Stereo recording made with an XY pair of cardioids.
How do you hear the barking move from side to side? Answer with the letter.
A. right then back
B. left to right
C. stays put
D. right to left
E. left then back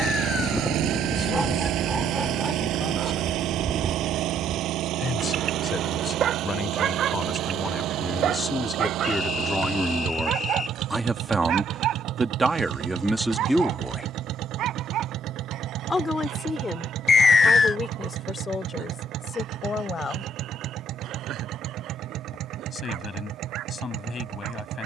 B.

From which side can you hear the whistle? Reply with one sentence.
You can hear the whistle on the left.